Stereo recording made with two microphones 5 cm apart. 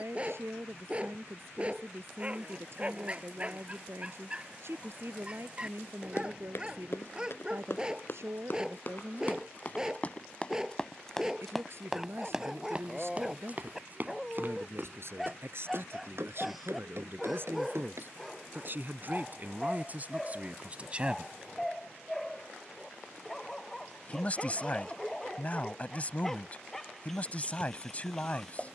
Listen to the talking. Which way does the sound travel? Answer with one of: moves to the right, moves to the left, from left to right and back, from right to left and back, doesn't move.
moves to the left.